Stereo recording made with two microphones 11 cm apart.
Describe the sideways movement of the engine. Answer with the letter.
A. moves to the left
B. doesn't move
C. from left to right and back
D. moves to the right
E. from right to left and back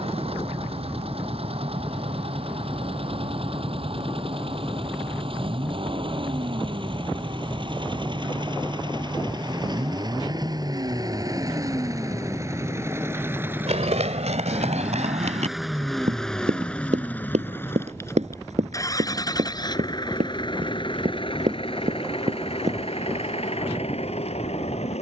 A.